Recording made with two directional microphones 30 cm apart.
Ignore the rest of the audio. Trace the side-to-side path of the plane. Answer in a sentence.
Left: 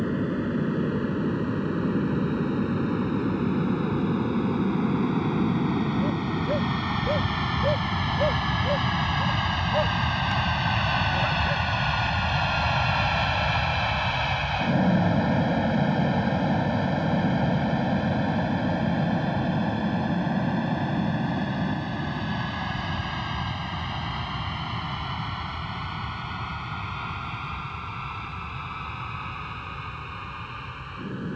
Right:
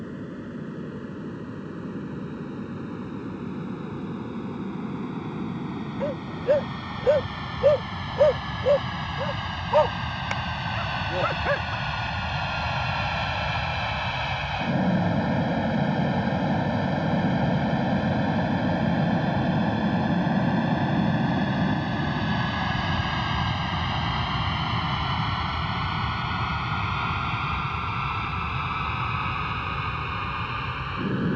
In this clip you hear the plane go from the left side to the right.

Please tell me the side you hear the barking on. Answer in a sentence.
You can hear the barking on the right.